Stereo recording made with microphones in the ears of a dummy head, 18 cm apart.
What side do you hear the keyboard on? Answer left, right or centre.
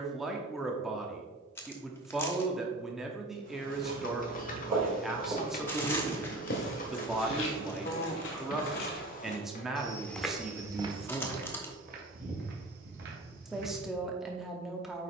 left.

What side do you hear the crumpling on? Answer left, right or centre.
centre.